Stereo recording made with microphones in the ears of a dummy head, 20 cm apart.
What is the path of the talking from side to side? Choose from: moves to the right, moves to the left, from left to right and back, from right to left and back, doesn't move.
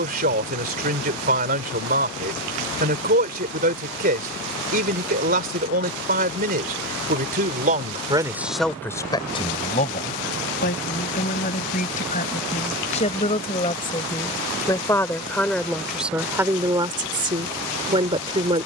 from right to left and back.